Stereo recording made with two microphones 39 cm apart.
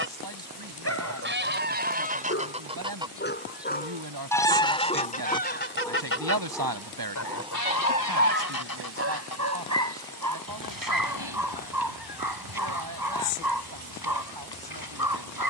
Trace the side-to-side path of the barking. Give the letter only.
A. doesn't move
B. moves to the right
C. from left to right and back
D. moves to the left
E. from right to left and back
B.